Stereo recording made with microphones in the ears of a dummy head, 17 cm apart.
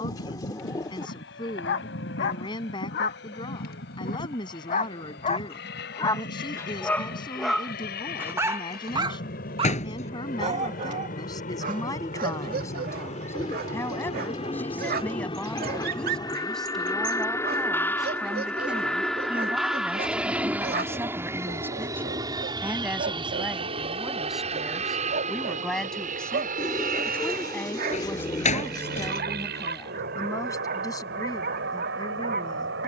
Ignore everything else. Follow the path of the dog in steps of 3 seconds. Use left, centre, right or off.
left, left, centre, right, right, right, right, right, right, right, right.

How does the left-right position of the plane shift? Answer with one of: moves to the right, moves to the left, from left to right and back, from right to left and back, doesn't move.
moves to the right.